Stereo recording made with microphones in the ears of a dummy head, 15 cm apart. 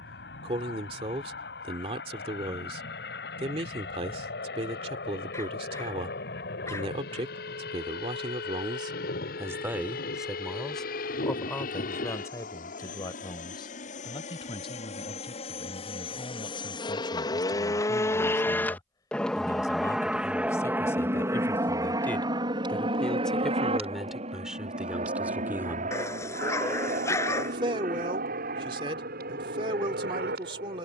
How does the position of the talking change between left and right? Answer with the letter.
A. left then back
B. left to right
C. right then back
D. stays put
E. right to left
A.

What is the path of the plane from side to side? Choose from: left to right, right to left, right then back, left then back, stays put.
left to right.